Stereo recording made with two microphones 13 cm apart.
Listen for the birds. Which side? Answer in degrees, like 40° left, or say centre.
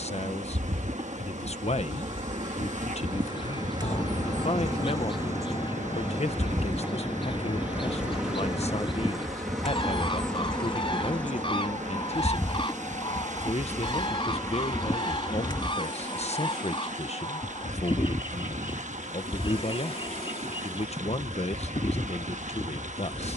40° left.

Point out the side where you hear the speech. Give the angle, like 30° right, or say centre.
50° left.